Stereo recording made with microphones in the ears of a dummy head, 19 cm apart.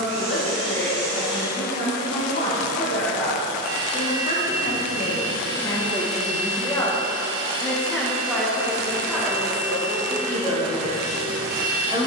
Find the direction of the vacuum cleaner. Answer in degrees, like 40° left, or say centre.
70° right.